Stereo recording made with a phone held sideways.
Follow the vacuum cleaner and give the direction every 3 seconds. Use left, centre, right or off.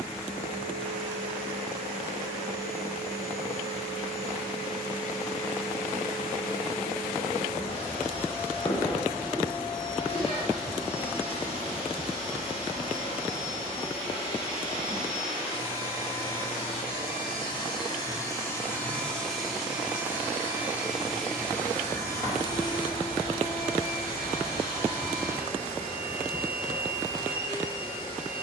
left, left, left, left, left, left, centre, left, left, left.